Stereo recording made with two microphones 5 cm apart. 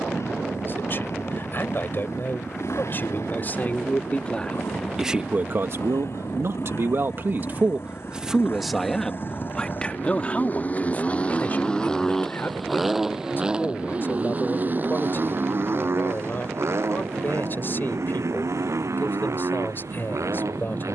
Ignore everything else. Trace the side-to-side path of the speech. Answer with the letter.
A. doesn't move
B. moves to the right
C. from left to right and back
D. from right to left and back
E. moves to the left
C.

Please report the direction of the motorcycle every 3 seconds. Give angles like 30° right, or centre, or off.
70° left, 60° left, 50° left, 30° left, 20° right, 60° right, 70° right.